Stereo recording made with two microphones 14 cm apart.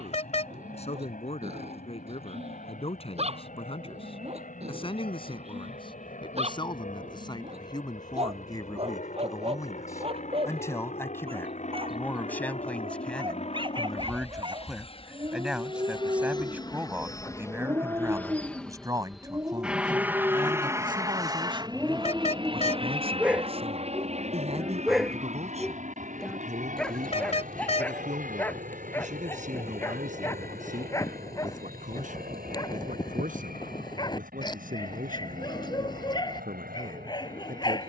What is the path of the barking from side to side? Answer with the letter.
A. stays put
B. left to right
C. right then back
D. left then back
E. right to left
E.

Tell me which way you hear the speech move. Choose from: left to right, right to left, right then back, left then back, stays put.
left to right.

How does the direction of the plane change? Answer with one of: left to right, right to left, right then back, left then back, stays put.
left to right.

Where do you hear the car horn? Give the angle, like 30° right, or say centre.
50° left.